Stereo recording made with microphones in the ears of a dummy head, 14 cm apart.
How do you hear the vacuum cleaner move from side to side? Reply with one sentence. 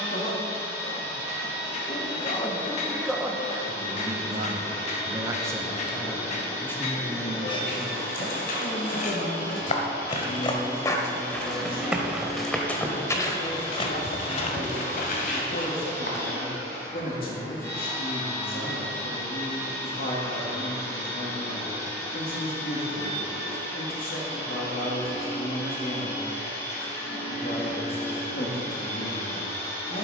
You can hear the vacuum cleaner stay put.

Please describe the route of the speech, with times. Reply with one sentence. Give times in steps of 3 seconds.
In this clip you hear the speech on the left from 0 s, on the right from 3 s and on the left from 6 s.